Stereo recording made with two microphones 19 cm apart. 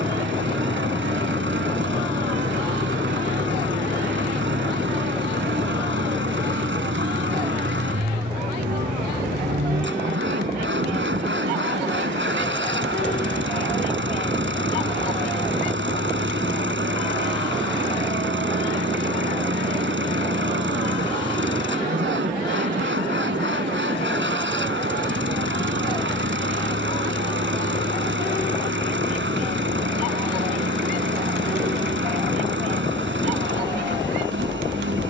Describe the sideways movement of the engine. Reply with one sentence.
You can hear the engine stay put.